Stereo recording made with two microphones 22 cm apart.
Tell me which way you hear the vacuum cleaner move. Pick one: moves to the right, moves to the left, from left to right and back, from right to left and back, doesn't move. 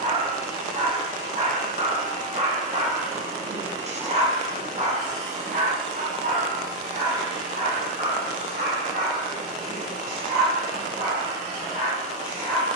doesn't move.